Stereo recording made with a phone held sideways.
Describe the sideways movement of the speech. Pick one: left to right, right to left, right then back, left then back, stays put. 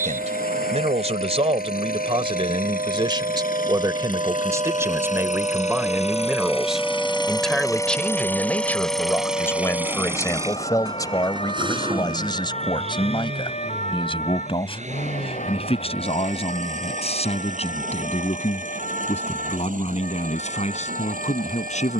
right to left.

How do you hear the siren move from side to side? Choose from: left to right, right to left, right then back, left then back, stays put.
right to left.